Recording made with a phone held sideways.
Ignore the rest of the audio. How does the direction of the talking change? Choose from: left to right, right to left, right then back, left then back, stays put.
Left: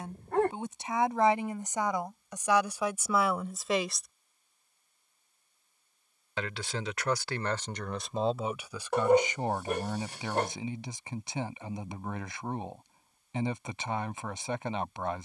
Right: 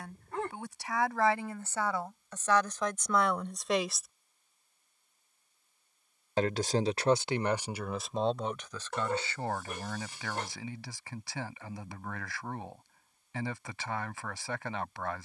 right then back.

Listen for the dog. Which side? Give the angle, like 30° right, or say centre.
70° left.